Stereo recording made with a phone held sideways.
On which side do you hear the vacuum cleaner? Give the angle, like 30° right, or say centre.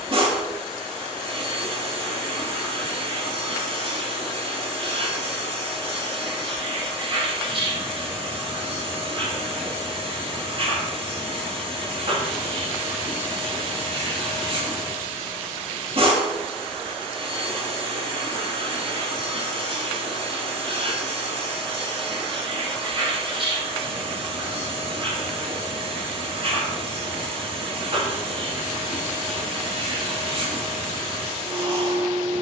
40° right.